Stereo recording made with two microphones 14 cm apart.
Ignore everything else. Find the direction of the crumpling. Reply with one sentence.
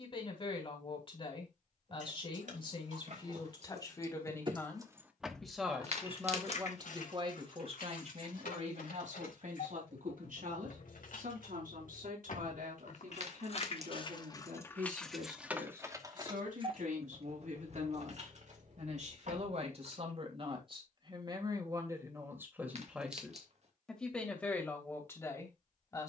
In this clip you hear the crumpling on the right.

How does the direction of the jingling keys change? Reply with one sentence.
In this clip you hear the jingling keys go left and come back.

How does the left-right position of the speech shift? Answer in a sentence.
You can hear the speech go right and come back.